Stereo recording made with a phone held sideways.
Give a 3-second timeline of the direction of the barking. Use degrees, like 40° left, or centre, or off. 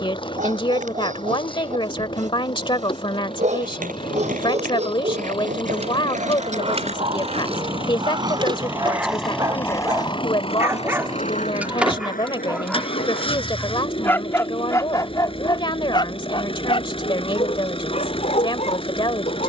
60° right, 50° right, 40° right, 20° right, 10° left, 40° left, 50° left.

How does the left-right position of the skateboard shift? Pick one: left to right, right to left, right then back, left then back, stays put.
right to left.